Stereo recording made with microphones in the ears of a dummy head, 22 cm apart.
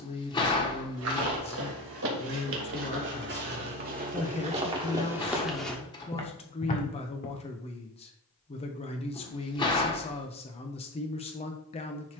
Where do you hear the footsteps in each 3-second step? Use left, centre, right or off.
right, right, left, off.